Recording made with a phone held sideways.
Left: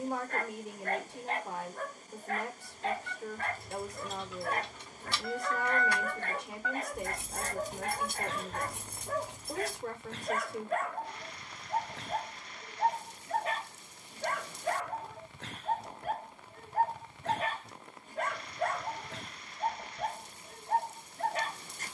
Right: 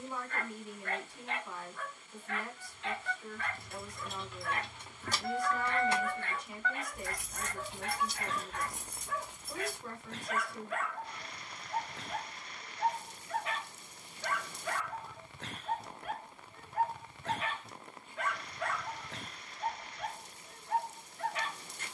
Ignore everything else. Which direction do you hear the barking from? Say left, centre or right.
left.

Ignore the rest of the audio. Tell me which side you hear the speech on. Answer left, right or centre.
left.